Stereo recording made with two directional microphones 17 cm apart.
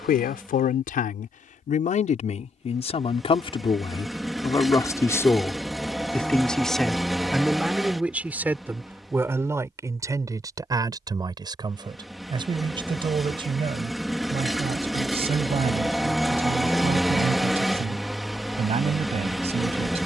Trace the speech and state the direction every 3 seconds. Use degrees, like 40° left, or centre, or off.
50° left, 20° left, centre, 20° right, 30° right, 40° right, 40° right.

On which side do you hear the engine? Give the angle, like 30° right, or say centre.
centre.